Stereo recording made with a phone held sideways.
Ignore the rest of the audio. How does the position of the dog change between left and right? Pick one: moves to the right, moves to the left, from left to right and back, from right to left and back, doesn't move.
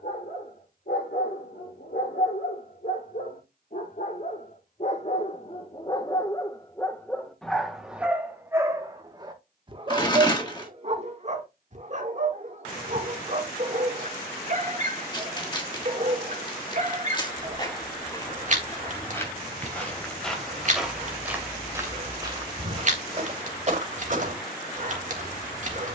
moves to the right.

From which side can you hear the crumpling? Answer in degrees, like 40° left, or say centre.
30° left.